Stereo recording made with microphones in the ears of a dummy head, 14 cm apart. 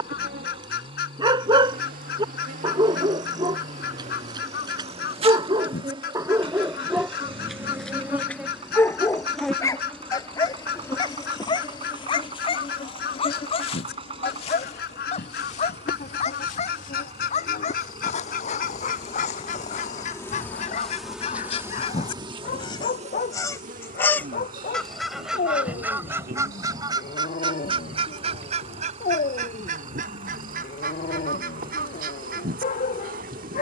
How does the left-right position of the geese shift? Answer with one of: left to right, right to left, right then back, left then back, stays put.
left to right.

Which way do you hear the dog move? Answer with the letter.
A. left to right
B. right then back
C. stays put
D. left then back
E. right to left
E.